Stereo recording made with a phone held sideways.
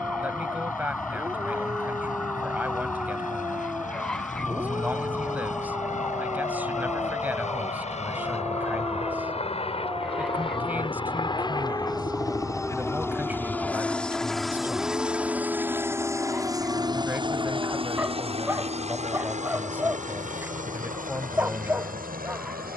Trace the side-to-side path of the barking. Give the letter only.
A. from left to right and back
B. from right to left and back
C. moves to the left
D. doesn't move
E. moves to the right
D.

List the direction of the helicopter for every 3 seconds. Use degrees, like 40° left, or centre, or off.
60° left, 60° left, 50° left, 40° left, 10° left, 20° right, 50° right, 60° right.